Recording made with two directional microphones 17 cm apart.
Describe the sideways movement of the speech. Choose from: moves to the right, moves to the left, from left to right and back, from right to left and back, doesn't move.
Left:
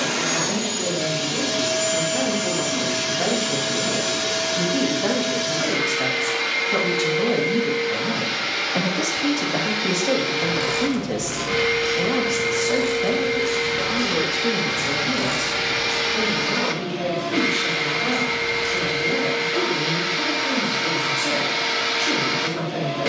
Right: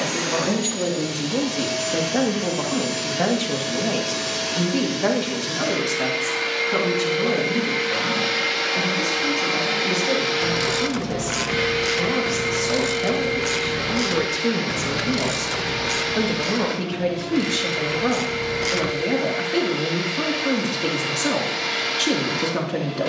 from right to left and back.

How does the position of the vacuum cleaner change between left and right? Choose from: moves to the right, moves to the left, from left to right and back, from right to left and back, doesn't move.
from left to right and back.